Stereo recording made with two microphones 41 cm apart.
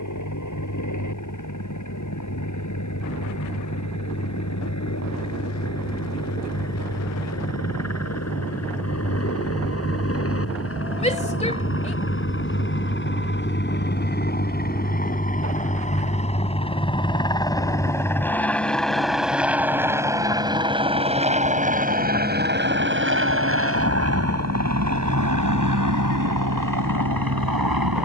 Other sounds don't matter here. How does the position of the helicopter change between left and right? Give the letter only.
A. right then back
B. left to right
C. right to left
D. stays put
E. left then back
B.